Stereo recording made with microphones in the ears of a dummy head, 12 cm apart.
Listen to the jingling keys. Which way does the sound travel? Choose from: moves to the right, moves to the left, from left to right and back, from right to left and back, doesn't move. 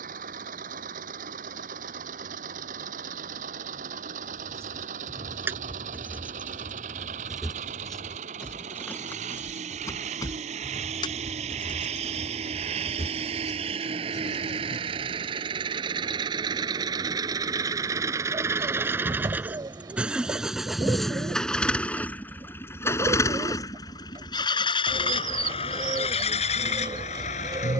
moves to the left.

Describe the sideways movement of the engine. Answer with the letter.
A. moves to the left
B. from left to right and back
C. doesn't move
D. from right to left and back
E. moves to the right
A.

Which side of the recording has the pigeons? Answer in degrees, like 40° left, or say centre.
30° right.